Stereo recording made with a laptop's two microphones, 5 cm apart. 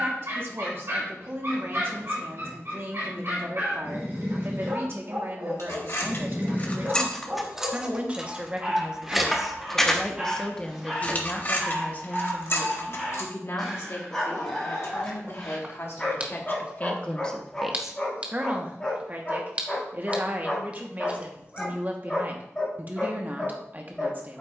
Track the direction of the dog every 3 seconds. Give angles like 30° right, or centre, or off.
60° right, 50° right, 30° right, 10° right, 10° left, 20° left, 20° left, 20° left.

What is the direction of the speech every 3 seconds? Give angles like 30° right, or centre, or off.
50° right, 50° right, 30° right, 10° left, 50° left, 30° left, 30° right, 40° right.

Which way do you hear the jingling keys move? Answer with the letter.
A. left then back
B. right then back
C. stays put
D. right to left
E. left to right
B.